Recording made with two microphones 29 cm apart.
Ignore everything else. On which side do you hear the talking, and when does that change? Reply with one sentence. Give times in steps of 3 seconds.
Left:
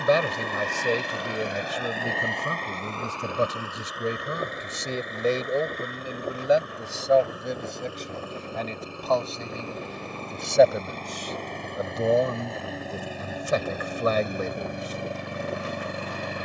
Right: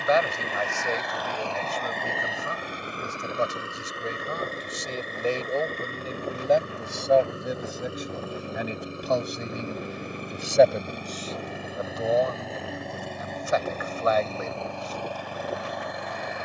You can hear the talking on the left from 0 s, in the centre from 6 s, on the left from 12 s and not at all from 15 s.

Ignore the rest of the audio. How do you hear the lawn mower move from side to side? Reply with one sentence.
In this clip you hear the lawn mower go right and come back.